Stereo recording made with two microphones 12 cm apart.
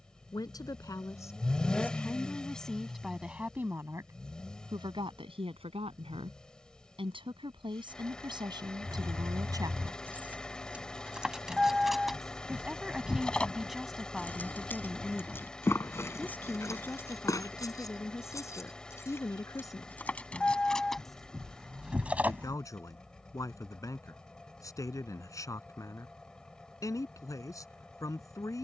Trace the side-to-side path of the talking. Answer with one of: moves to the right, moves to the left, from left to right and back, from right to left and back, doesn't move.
from left to right and back.